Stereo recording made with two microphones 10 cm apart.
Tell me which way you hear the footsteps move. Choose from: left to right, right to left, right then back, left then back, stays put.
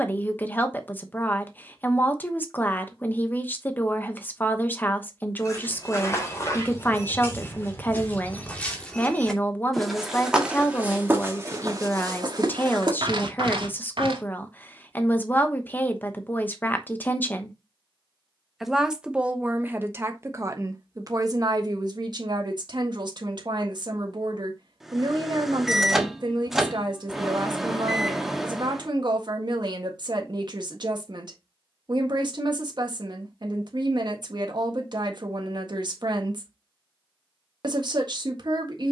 left to right.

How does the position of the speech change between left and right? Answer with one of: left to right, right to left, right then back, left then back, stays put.
left to right.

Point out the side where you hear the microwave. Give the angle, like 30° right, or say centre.
centre.